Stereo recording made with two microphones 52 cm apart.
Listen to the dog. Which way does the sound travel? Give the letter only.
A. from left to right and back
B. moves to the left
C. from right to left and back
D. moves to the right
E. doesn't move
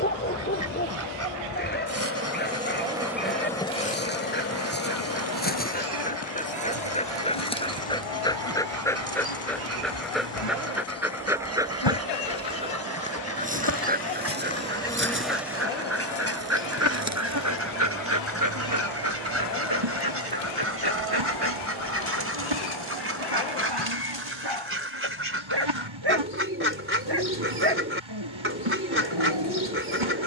D.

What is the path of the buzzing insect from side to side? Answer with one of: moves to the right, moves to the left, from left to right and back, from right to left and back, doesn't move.
from right to left and back.